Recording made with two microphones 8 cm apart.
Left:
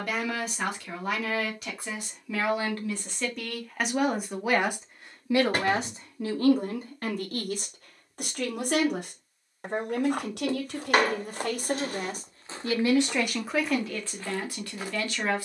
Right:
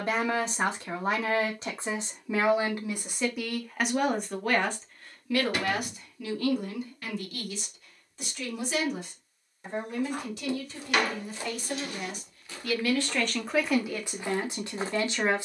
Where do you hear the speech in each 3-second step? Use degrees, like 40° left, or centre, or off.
20° right, 10° left, 50° left, 60° left, centre.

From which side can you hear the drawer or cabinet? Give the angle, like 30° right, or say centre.
40° left.